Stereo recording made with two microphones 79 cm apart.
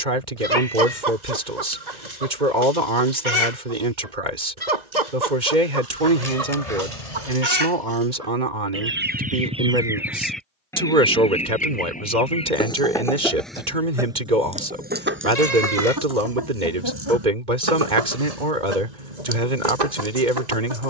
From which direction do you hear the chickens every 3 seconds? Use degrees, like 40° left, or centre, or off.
60° right, 60° right, 40° right, centre, centre, 30° right, 60° right.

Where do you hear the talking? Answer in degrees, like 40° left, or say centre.
70° right.